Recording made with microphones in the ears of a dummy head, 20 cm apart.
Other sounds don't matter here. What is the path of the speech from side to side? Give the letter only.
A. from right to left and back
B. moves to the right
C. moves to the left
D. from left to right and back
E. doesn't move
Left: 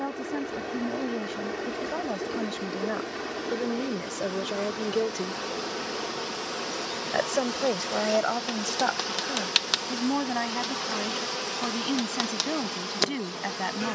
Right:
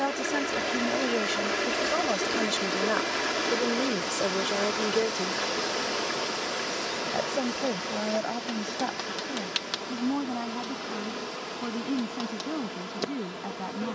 C.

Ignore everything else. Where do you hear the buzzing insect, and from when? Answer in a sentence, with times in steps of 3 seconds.
You can hear the buzzing insect on the right from 0 s, in the centre from 6 s and on the left from 9 s.